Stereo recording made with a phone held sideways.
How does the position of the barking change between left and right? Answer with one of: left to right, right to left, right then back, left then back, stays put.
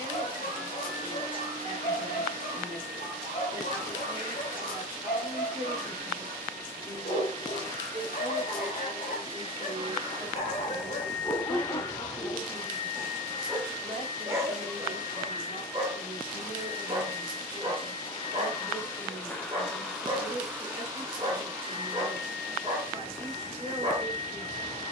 left to right.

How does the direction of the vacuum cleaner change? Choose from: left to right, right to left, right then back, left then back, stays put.
left then back.